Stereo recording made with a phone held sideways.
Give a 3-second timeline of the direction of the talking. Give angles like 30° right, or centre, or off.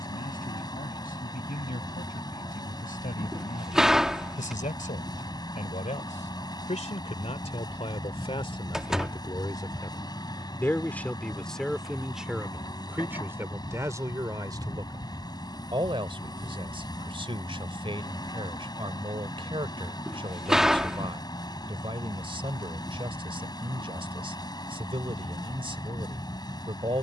70° left, 60° left, 40° left, 10° left, 20° right, 40° right, 40° right, 40° right, 40° right.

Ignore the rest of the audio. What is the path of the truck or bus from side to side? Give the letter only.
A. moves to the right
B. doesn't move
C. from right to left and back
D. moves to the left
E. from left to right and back
B.